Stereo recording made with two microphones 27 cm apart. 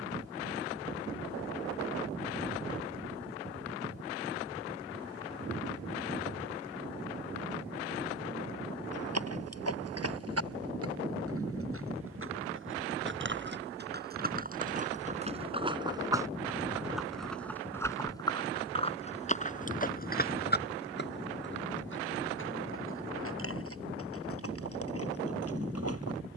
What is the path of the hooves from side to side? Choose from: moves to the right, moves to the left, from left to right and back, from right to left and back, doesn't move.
moves to the left.